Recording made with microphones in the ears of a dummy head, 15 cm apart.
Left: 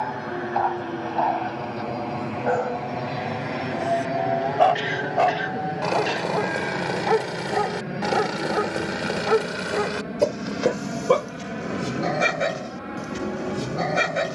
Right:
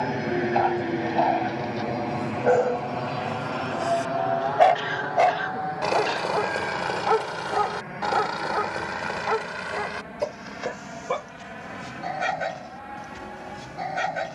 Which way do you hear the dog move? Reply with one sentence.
In this clip you hear the dog travel towards the left.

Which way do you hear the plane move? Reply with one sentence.
You can hear the plane move from right to left.